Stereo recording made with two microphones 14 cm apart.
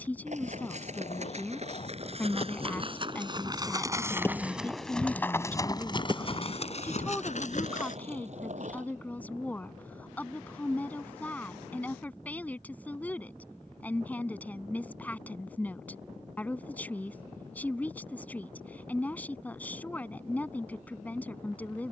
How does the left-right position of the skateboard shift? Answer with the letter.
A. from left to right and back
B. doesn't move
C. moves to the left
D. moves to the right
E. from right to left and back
D.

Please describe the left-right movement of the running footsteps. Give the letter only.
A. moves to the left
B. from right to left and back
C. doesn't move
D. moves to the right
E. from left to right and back
A.